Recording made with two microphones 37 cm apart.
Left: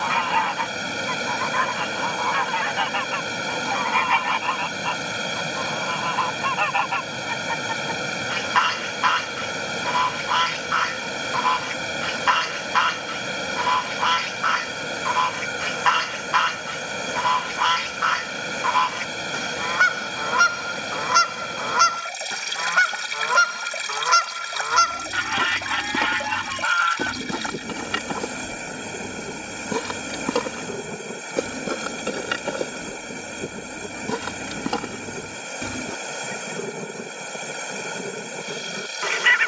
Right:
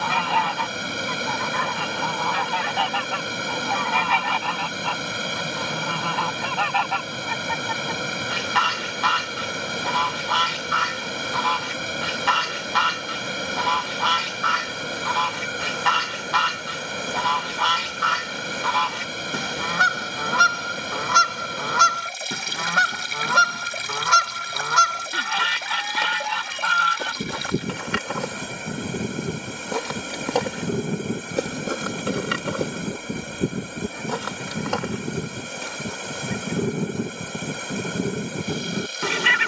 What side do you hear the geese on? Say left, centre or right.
right.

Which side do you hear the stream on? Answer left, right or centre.
centre.